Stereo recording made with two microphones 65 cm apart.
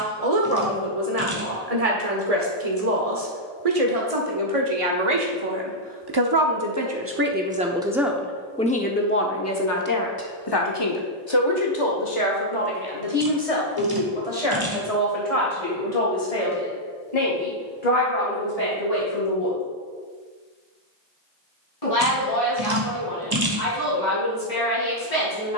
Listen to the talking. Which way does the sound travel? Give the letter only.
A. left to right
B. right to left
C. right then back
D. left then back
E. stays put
B.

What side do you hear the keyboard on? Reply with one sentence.
In this clip you hear the keyboard on the right.